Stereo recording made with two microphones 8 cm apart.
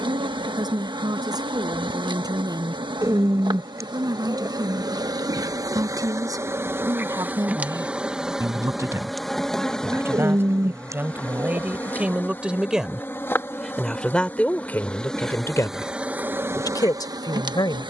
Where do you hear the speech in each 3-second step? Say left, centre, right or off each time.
right, right, right, right, centre, left.